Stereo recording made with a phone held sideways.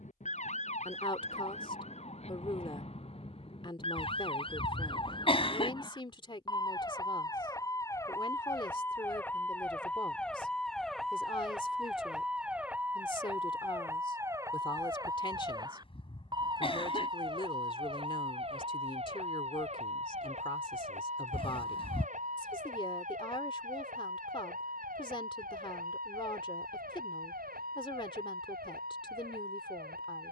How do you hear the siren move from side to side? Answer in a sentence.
You can hear the siren go from the left side to the right.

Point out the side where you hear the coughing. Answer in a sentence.
You can hear the coughing on the left.